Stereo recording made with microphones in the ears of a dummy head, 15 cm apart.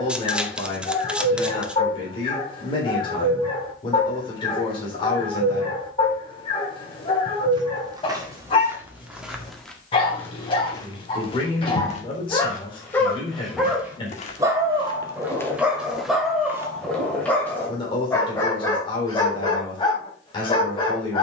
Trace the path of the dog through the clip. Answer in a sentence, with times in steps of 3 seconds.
You can hear the dog on the left from 0 s, in the centre from 12 s and on the left from 18 s.